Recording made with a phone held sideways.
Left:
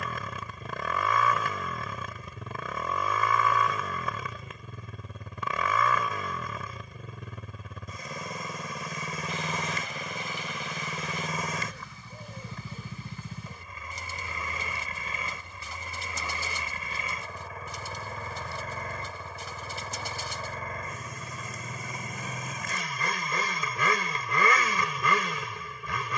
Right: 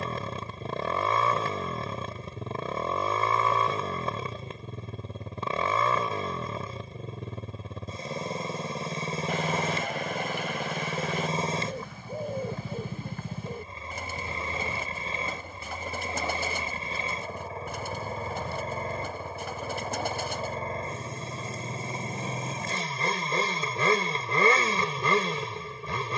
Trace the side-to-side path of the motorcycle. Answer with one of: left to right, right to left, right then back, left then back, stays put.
stays put.